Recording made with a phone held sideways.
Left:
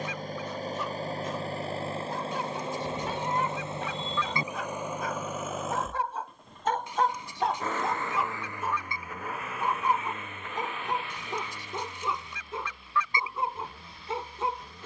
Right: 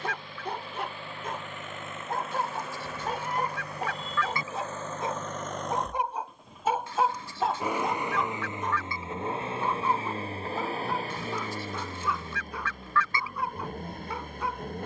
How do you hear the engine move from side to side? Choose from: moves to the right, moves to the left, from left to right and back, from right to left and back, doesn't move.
moves to the right.